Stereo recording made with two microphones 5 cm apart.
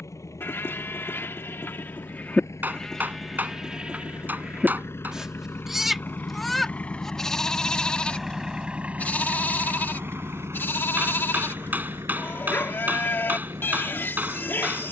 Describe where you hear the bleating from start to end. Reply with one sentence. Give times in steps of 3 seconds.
In this clip you hear the bleating on the left from 0 s, in the centre from 3 s and on the left from 9 s.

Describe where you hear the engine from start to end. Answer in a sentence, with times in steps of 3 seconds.
You can hear the engine on the left from 0 s, in the centre from 6 s and on the right from 9 s.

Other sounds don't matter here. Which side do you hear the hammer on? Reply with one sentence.
In this clip you hear the hammer on the right.